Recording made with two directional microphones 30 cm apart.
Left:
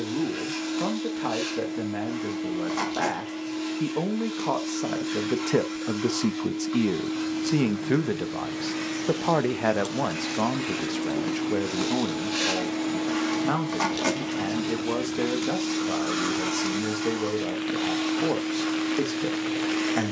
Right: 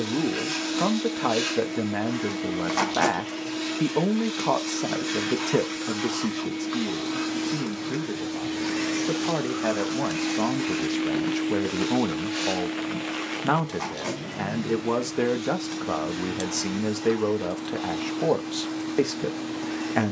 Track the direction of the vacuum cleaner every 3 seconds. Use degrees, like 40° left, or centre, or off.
40° right, 40° right, 30° right, centre, 40° left, 60° left, 60° left.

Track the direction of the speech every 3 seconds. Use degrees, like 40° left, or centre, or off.
30° right, 10° right, 40° left, 10° left, 20° right, 30° right, 30° right.